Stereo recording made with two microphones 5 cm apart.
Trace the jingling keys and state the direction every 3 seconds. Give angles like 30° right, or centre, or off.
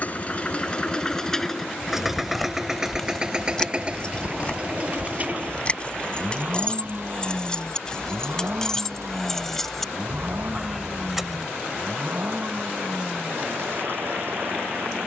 centre, 20° left, 20° left, centre, off.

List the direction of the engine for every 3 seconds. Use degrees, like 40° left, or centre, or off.
10° left, 30° right, 40° right, 50° right, 50° right.